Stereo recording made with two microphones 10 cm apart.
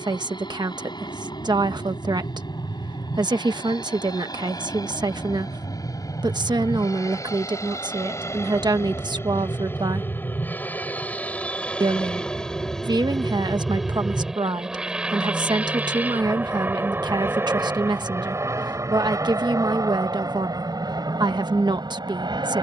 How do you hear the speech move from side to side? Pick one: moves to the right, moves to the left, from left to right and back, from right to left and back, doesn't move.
doesn't move.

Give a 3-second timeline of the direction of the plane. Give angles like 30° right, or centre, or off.
50° left, 40° left, 30° left, 20° left, centre, 20° right, 30° right, 40° right.